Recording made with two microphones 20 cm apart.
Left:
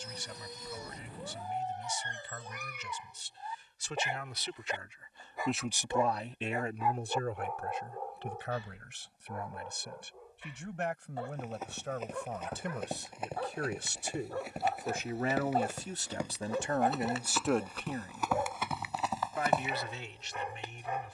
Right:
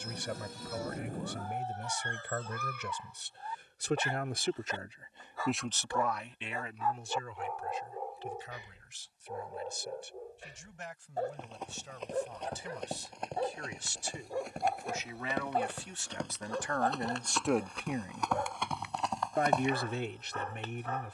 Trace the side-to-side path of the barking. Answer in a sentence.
You can hear the barking move from left to right and back again.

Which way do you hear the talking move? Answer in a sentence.
In this clip you hear the talking move from right to left and back again.